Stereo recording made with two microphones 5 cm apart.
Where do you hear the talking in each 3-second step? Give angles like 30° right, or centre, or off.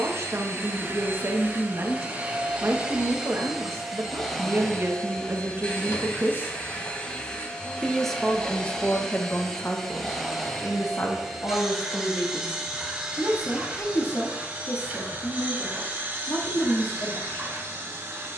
50° right, 50° right, centre, 50° left, 70° left, 70° left.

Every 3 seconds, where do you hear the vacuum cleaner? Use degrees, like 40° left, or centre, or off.
30° right, 10° left, 20° left, centre, 20° right, 40° right.